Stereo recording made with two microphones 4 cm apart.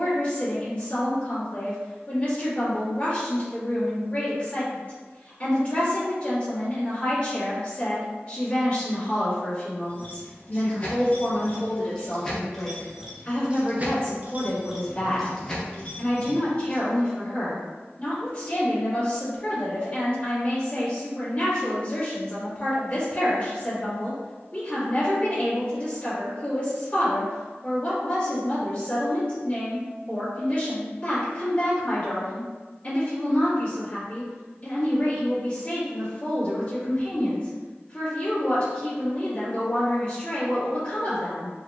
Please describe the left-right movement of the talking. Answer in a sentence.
You can hear the talking stay put.